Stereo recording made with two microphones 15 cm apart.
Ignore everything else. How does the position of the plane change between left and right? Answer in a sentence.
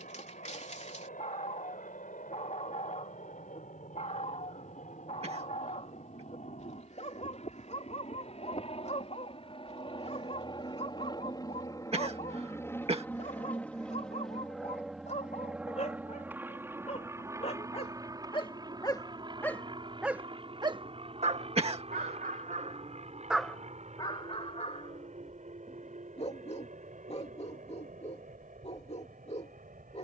You can hear the plane travel towards the right.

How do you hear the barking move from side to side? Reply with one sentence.
In this clip you hear the barking move from left to right and back again.